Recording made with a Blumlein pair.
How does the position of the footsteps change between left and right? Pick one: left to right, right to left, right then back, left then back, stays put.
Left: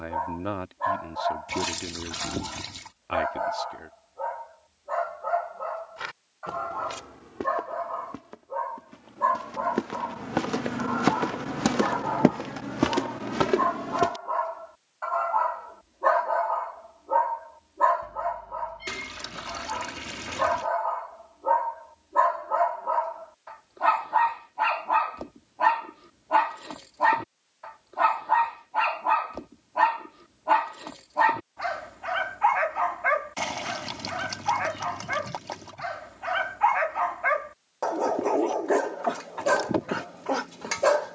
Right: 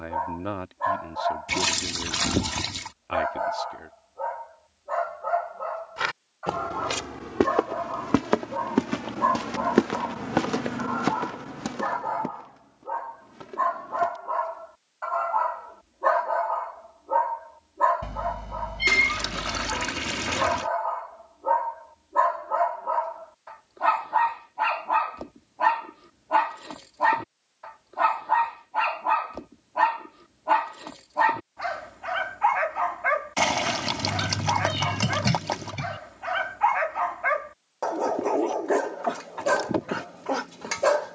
right to left.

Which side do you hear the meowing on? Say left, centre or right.
right.